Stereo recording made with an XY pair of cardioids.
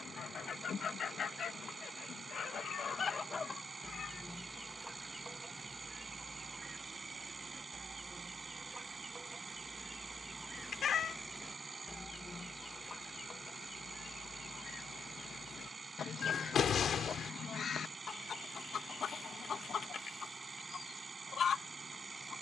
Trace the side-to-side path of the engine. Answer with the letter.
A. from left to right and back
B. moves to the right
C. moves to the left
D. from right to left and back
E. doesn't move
E.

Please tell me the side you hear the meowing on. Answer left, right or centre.
left.